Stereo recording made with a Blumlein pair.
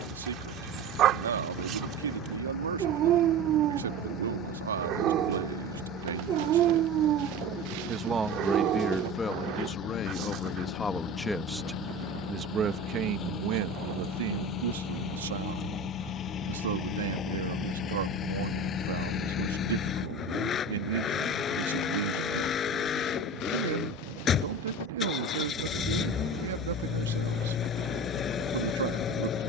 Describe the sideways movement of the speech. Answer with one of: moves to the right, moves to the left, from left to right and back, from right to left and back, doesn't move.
from right to left and back.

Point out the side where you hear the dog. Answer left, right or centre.
right.